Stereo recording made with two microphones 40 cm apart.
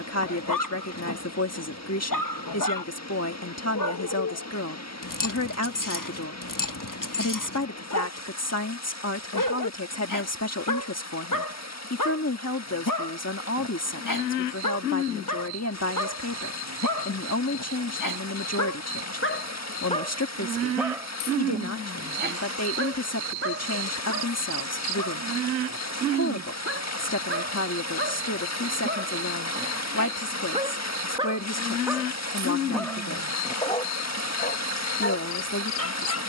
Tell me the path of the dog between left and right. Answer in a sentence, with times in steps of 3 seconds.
You can hear the dog on the left from 0 s, on the right from 21 s, in the centre from 30 s and on the left from 33 s.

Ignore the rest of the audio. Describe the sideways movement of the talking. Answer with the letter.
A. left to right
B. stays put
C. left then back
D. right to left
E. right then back
B.